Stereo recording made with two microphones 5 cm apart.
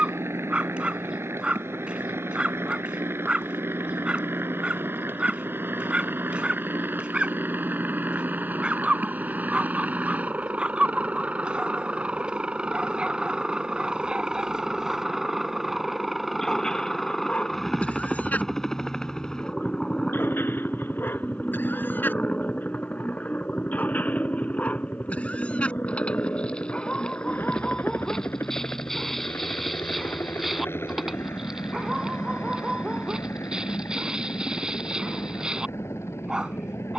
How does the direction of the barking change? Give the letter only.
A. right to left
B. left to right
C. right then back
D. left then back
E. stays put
D.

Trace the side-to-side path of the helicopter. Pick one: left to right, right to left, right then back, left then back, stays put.
right to left.